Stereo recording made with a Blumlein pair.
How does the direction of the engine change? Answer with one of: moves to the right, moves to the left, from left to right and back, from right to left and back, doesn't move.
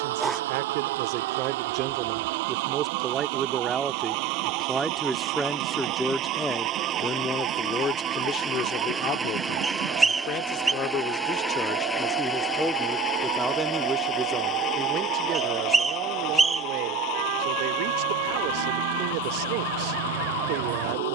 moves to the left.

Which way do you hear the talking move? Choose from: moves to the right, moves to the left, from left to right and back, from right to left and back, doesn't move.
from right to left and back.